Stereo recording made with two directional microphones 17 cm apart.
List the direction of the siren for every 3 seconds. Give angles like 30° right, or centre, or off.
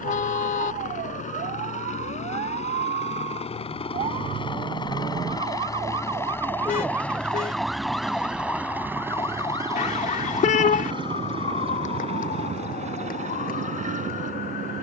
60° right, 40° right, centre, 30° left, 50° left.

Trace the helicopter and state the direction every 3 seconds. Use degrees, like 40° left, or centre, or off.
50° left, 30° left, centre, 20° right, 40° right.